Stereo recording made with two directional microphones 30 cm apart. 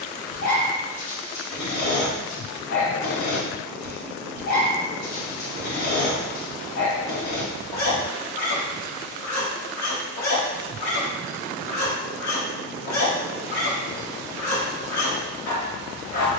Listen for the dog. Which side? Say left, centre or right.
left.